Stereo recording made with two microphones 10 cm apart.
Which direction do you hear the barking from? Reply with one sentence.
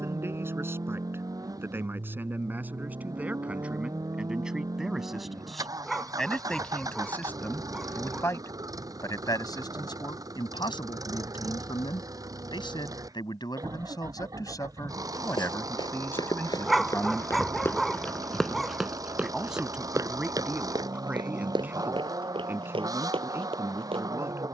In this clip you hear the barking in the centre.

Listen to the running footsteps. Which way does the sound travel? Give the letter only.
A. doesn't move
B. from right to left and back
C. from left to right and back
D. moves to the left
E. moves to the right
E.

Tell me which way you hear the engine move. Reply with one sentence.
You can hear the engine stay in one place.